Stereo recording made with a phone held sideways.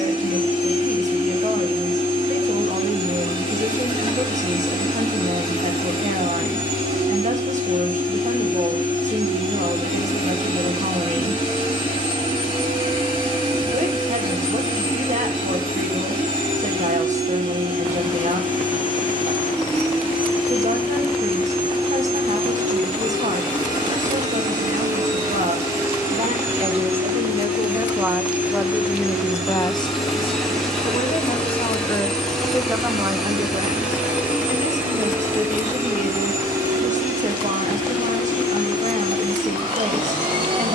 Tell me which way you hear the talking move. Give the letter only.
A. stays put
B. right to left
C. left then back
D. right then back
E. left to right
C.